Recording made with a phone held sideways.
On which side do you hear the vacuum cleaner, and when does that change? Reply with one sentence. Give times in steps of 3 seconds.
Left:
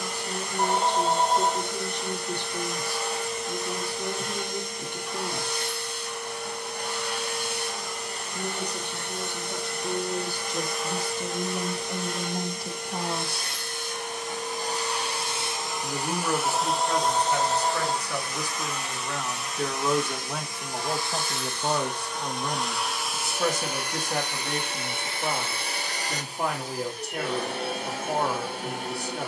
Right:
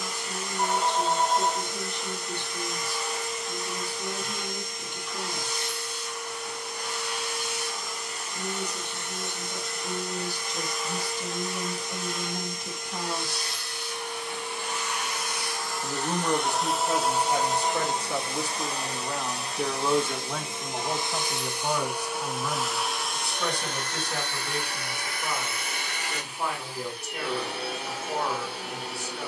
In this clip you hear the vacuum cleaner on the left from 0 s, in the centre from 15 s, on the right from 18 s, in the centre from 21 s and on the left from 24 s.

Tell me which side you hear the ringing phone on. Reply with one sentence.
You can hear the ringing phone on the left.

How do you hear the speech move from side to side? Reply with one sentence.
In this clip you hear the speech go right and come back.